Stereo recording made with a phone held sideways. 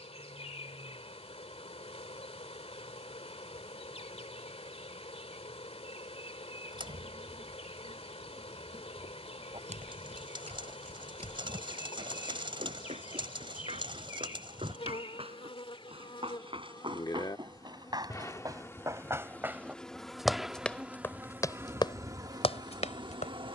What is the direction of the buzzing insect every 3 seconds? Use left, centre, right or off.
left, left, left, left, left, left, centre, right.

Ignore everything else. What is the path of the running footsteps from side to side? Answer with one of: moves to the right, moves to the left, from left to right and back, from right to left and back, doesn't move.
moves to the left.